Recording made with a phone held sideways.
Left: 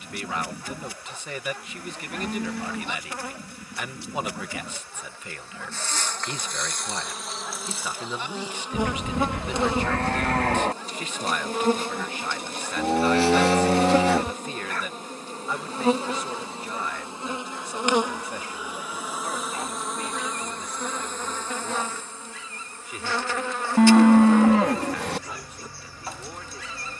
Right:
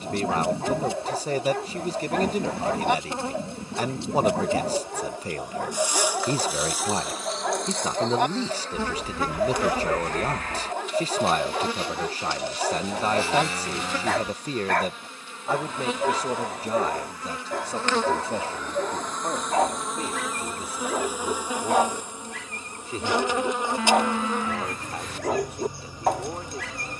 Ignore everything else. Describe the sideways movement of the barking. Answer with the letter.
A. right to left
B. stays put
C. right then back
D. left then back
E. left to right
B.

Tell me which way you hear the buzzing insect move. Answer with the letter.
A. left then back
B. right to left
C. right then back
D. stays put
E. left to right
A.